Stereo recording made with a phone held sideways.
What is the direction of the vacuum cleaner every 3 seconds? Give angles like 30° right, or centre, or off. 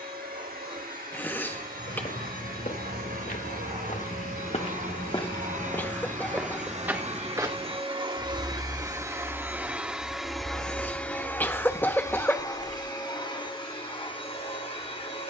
80° right, 60° right, 40° right, centre, 30° left.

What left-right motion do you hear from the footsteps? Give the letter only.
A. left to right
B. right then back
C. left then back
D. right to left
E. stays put
A.